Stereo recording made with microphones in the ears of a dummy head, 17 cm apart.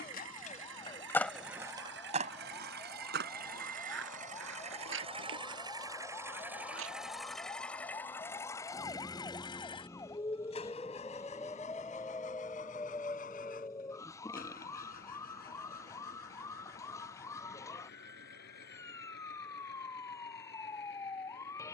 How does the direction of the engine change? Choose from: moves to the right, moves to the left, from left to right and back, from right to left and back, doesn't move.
moves to the left.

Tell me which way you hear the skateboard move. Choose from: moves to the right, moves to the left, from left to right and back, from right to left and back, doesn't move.
moves to the right.